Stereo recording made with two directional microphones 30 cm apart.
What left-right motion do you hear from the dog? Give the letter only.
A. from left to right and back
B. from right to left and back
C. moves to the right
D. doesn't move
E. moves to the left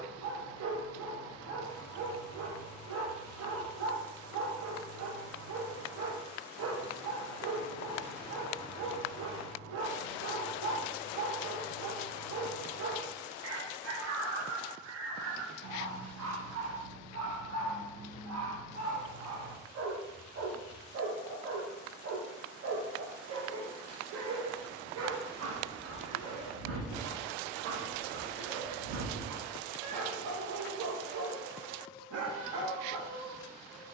D.